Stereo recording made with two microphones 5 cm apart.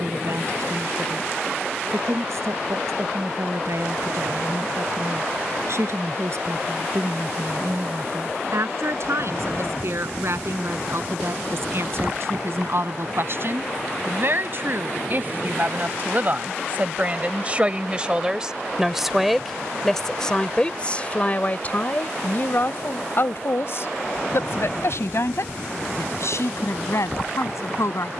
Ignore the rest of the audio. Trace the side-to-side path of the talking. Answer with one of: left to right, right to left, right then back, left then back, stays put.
right to left.